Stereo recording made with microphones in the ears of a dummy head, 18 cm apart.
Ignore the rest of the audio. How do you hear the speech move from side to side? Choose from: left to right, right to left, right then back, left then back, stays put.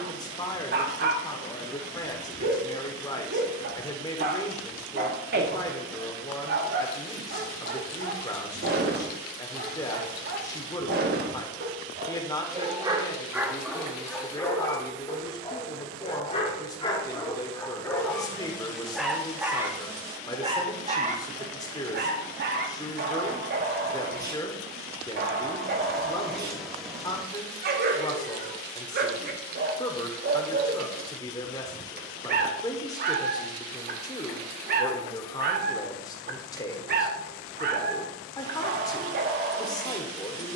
stays put.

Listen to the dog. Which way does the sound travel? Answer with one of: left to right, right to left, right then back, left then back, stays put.
left then back.